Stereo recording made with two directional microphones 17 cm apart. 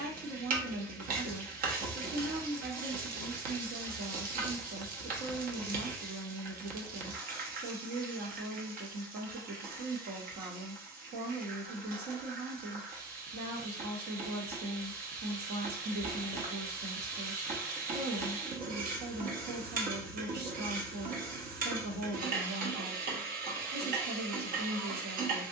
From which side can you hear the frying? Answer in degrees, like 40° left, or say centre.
60° right.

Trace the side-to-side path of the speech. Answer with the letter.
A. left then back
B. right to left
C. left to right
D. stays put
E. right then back
D.